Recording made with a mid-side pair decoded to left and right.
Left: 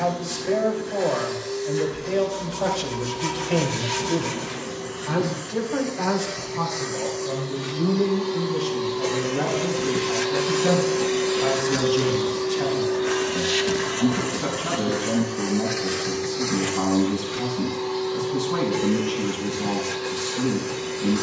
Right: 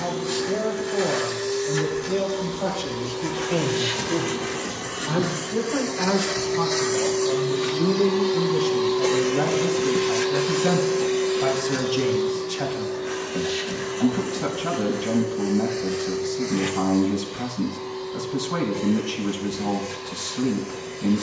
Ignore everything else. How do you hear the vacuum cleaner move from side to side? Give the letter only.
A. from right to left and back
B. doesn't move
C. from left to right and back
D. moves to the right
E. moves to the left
E.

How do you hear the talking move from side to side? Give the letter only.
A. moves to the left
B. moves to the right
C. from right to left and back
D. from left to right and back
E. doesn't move
B.